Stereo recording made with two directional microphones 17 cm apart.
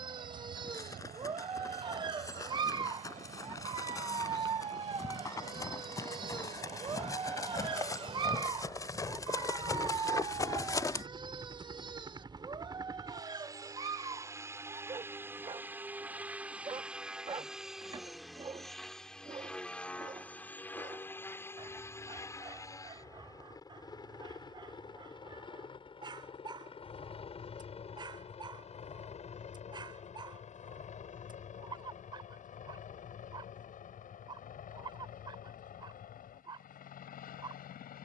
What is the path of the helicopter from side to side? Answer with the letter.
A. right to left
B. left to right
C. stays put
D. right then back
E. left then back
A.